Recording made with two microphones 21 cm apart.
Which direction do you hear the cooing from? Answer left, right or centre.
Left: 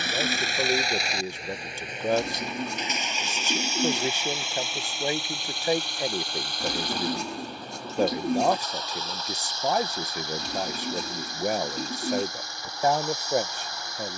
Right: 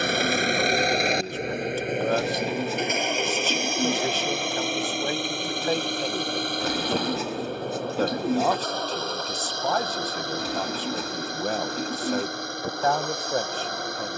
centre.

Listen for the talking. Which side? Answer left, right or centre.
centre.